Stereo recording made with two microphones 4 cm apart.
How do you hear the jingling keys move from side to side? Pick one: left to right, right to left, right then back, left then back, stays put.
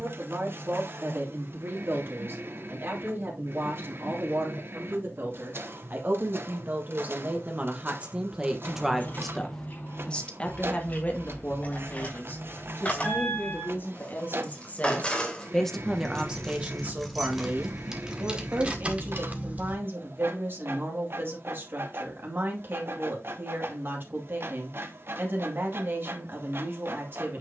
left to right.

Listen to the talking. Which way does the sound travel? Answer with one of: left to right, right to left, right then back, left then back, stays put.
left then back.